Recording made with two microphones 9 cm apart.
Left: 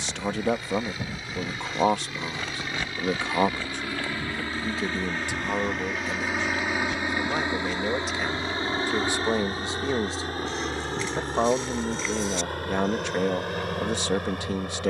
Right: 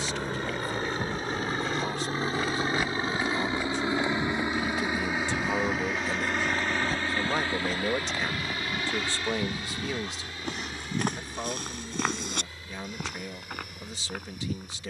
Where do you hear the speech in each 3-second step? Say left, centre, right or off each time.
left, left, centre, left, left.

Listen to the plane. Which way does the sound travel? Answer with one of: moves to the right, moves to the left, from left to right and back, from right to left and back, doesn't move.
moves to the left.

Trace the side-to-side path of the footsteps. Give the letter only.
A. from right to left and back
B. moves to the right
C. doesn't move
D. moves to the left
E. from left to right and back
B.